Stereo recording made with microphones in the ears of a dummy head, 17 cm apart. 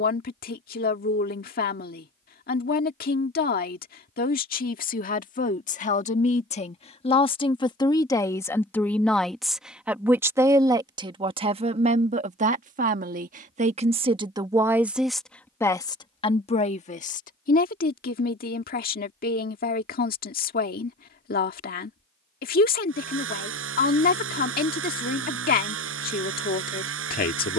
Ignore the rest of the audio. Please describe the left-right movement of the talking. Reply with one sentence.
In this clip you hear the talking move from left to right and back again.